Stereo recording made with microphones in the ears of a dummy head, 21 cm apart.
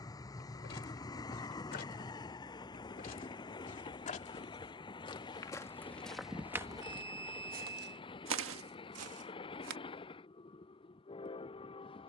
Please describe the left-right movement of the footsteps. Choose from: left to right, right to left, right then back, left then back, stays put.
left to right.